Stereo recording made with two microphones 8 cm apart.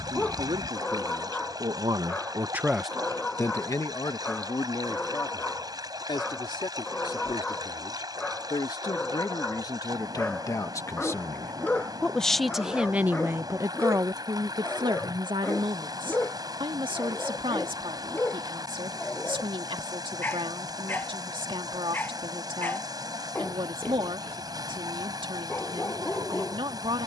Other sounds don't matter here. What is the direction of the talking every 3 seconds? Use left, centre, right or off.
right, left, left, left, right, right, right, right, right.